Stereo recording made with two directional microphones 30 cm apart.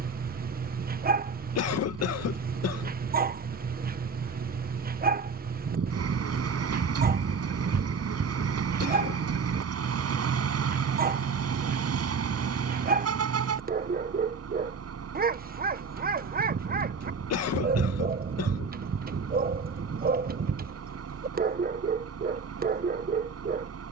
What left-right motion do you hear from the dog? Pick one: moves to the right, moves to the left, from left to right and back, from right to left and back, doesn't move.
doesn't move.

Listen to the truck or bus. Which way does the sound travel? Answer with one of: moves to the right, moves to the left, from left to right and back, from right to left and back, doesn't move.
doesn't move.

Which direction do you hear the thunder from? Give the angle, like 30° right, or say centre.
40° right.